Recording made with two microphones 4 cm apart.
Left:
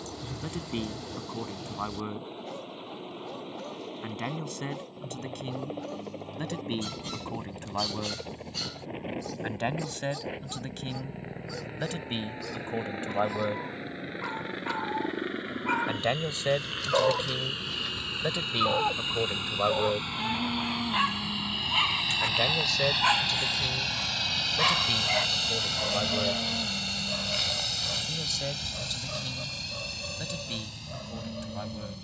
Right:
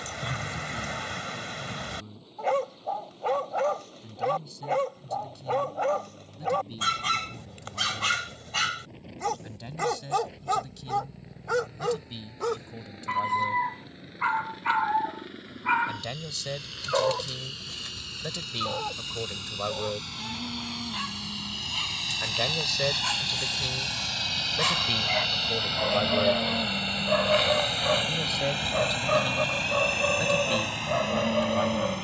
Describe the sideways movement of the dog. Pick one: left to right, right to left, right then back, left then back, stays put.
left then back.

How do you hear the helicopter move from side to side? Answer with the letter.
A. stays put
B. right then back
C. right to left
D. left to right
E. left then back
D.